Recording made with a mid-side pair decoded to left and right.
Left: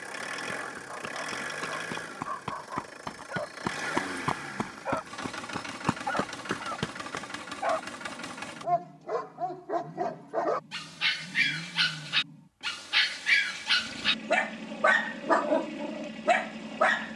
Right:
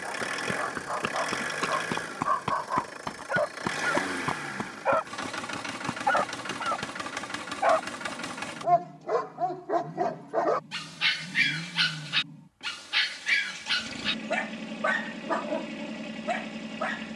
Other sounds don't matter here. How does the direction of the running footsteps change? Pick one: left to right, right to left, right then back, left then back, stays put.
right to left.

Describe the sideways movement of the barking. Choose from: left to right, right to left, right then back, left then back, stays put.
right to left.